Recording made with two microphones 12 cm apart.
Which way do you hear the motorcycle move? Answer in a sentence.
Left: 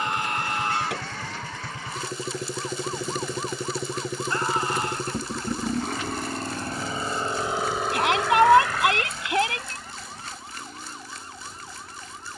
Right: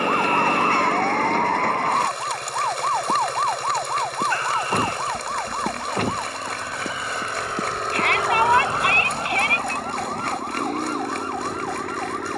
In this clip you hear the motorcycle move to the right.